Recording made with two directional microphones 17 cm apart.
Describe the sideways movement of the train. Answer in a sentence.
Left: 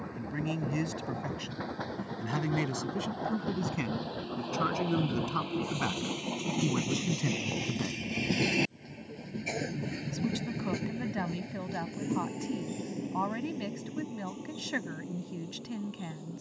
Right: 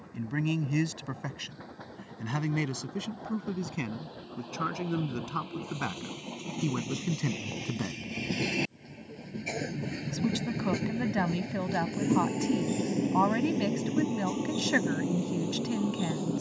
You can hear the train go from the left side to the right.